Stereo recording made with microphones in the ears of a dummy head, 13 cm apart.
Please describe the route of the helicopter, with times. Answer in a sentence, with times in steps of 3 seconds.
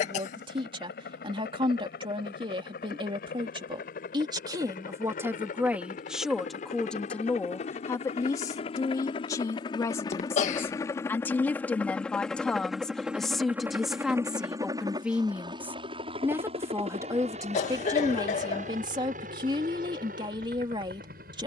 You can hear the helicopter on the left from 0 s, in the centre from 12 s and on the right from 15 s.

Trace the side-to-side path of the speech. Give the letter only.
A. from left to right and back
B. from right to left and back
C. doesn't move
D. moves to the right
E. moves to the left
B.